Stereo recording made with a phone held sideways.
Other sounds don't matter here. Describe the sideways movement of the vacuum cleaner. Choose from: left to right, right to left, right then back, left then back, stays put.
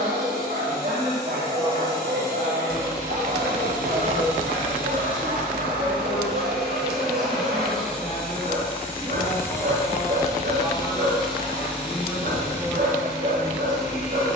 right to left.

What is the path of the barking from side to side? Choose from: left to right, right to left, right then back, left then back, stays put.
stays put.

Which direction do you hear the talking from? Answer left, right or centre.
centre.